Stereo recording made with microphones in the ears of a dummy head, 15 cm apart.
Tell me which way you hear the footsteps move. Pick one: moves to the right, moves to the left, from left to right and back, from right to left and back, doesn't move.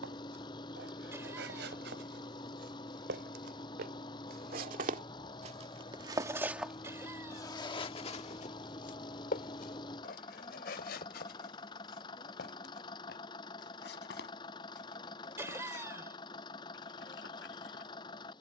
moves to the left.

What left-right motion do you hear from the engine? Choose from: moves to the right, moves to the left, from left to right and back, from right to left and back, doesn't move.
doesn't move.